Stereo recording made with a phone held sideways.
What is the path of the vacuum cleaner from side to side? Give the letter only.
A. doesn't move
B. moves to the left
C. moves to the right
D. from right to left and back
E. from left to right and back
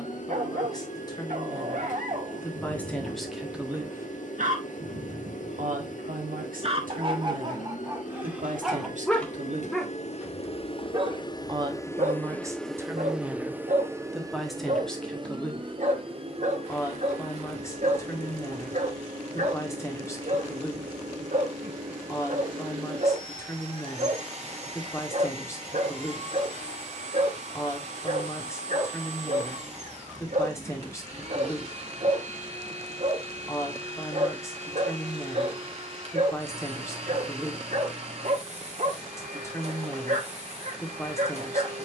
C.